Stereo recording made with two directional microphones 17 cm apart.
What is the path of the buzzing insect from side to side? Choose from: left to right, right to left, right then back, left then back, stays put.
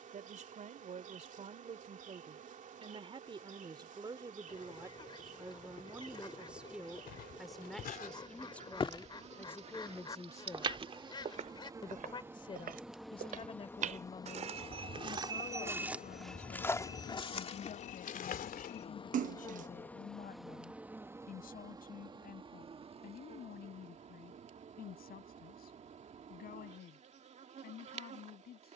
left then back.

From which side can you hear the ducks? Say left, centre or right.
left.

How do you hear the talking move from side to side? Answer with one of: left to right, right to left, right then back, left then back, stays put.
right to left.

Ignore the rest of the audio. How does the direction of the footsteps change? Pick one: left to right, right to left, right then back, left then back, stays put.
right then back.